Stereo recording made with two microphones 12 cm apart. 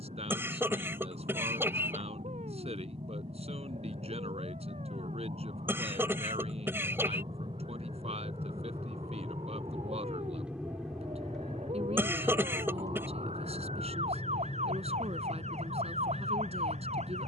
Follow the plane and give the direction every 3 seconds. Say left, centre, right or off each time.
right, right, right, centre, left, left.